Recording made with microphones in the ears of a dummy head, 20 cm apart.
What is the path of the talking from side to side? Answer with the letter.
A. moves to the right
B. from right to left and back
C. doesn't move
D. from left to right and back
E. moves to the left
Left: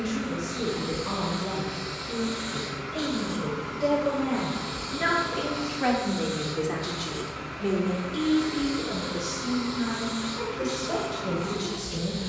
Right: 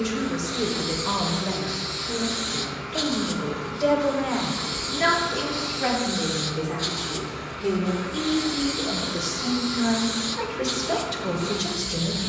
B.